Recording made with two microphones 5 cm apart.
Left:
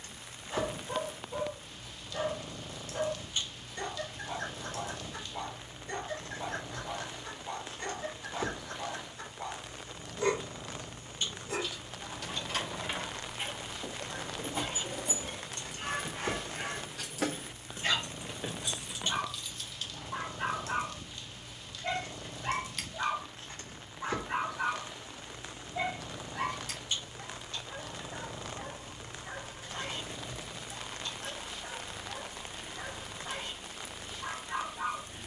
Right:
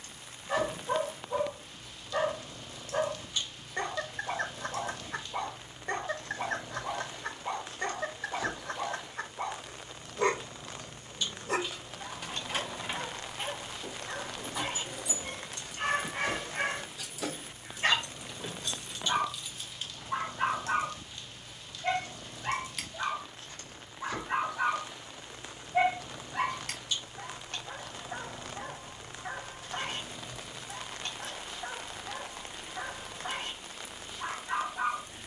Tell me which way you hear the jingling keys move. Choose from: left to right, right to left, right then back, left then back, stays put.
left then back.